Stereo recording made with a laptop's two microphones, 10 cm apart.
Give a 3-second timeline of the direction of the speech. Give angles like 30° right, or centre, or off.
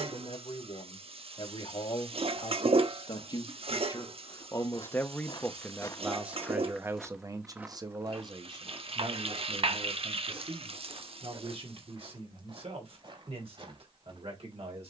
60° left, 30° left, 30° right, 60° right, 70° right.